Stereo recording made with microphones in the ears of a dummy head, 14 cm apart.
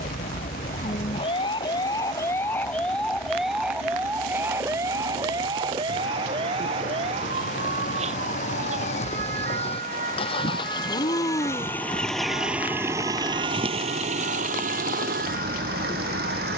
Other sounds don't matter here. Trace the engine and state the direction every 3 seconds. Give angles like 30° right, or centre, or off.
70° left, 60° left, 50° left, 30° left, 30° right, 70° right.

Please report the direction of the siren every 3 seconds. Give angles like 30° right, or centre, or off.
30° left, 10° right, 40° right, 50° right, 50° right, 60° right.